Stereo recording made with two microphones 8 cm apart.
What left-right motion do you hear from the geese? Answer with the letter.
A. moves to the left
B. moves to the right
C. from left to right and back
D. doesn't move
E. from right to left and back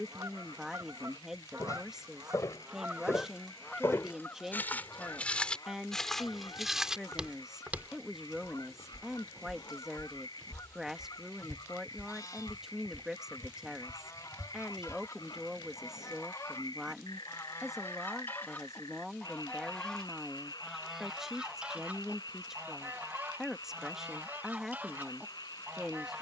E.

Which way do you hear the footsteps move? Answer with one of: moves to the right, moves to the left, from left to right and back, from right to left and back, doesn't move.
moves to the right.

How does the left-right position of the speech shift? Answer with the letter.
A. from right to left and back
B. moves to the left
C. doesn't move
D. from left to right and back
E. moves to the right
C.